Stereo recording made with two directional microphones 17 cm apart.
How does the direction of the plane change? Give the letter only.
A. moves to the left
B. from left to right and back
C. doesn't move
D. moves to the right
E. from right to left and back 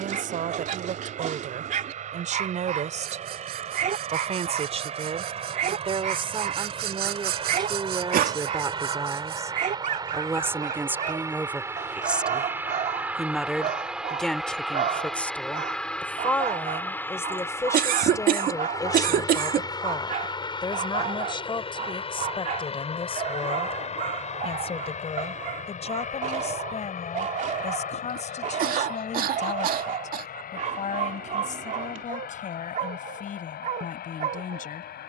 A.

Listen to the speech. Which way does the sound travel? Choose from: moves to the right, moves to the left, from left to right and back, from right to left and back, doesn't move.
moves to the left.